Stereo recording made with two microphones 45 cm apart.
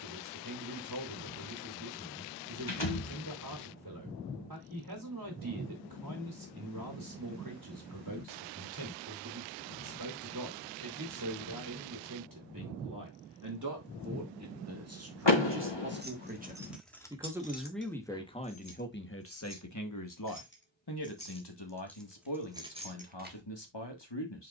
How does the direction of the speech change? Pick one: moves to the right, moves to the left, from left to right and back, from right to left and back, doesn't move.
moves to the left.